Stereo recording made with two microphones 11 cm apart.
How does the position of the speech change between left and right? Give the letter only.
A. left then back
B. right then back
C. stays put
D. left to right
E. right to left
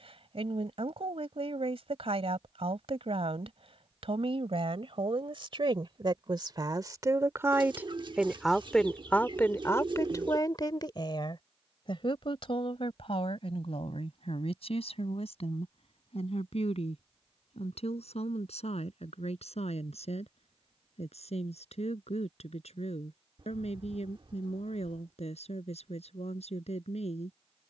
E.